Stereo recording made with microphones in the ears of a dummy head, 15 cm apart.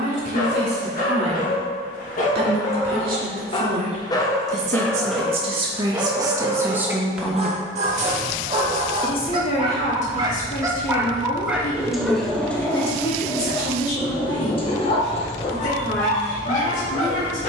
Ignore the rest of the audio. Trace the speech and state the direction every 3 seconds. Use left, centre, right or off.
right, right, centre, left, left, left.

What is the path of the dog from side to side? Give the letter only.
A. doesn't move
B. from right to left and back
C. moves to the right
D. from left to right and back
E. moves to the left
D.